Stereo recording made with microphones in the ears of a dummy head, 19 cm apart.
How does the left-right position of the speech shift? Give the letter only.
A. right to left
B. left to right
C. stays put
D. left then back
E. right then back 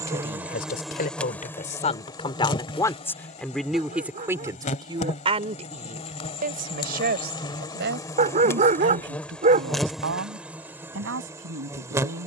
B.